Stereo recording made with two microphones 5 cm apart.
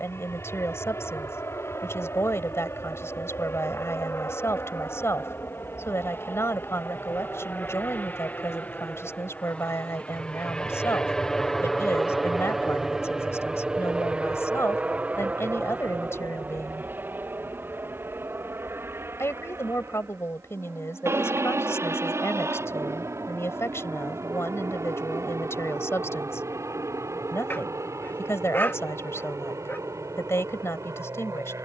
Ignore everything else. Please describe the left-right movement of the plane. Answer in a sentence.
You can hear the plane move to the right.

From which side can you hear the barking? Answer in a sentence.
In this clip you hear the barking on the left.